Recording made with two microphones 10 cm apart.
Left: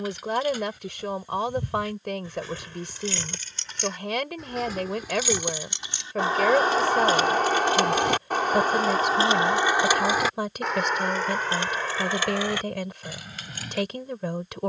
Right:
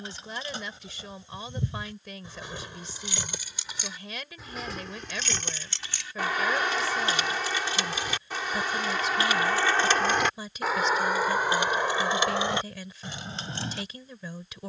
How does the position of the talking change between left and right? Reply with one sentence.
In this clip you hear the talking stay in one place.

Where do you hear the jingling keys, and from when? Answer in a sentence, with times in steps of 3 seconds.
In this clip you hear the jingling keys on the right from 0 s, in the centre from 3 s, on the left from 6 s, in the centre from 9 s and on the right from 12 s.